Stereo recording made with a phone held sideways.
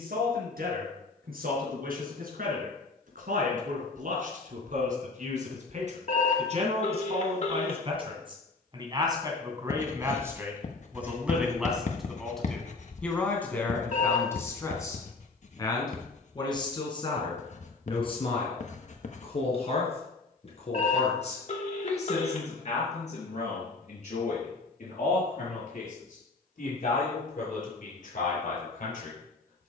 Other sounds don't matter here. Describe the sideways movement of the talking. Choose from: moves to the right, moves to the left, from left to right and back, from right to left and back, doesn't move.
moves to the left.